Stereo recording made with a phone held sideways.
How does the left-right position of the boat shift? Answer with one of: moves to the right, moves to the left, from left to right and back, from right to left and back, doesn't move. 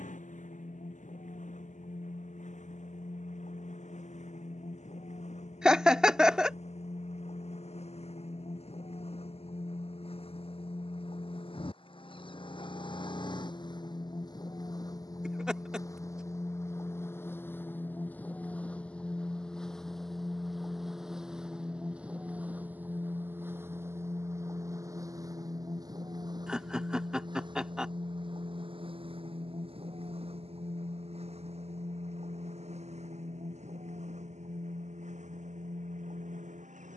moves to the right.